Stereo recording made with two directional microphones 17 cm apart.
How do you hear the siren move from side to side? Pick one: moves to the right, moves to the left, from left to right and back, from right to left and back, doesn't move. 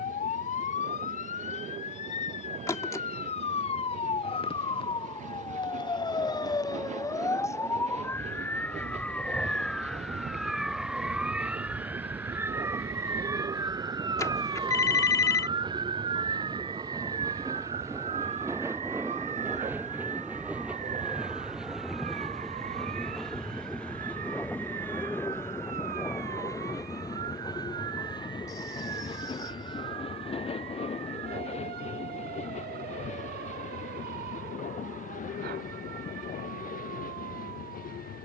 moves to the right.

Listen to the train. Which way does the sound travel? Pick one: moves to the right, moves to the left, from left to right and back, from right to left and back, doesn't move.
moves to the left.